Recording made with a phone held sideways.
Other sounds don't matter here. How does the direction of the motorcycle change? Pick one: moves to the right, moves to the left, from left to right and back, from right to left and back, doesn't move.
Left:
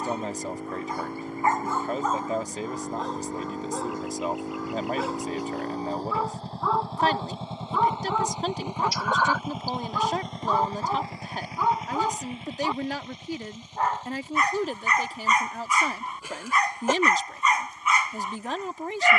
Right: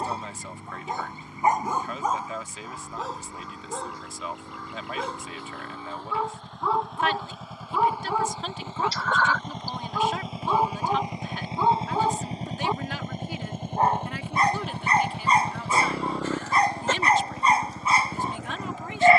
moves to the right.